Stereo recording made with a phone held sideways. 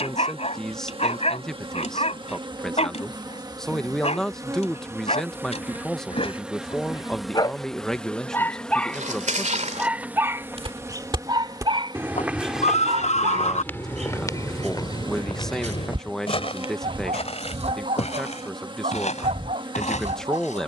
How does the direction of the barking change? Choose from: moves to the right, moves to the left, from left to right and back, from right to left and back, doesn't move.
moves to the right.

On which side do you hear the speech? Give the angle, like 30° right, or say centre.
centre.